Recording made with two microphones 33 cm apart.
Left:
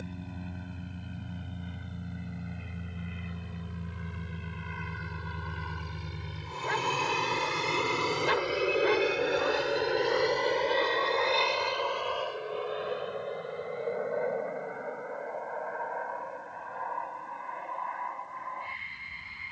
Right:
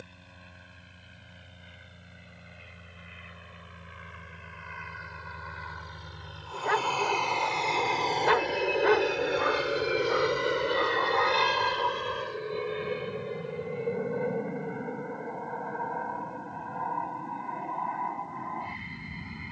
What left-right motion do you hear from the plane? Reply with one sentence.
You can hear the plane travel towards the right.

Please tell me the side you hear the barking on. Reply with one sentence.
In this clip you hear the barking on the right.